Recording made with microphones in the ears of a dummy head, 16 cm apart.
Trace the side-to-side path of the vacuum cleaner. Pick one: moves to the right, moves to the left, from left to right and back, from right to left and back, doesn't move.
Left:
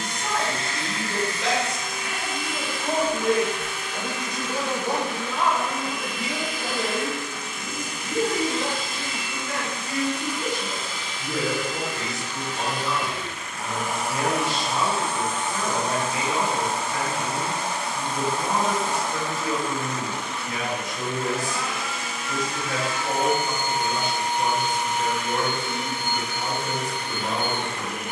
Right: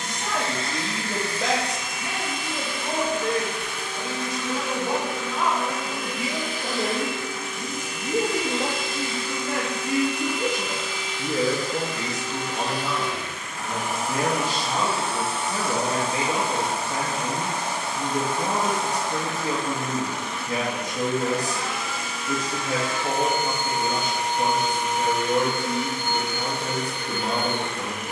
doesn't move.